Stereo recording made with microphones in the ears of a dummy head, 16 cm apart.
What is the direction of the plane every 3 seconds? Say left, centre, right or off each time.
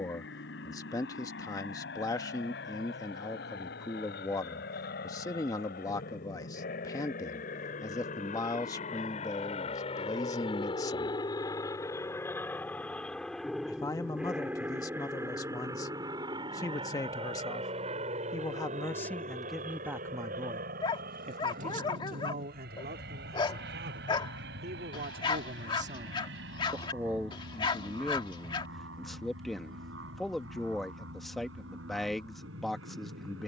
left, left, left, left, centre, right, right, right, right, right, right.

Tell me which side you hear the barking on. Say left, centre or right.
left.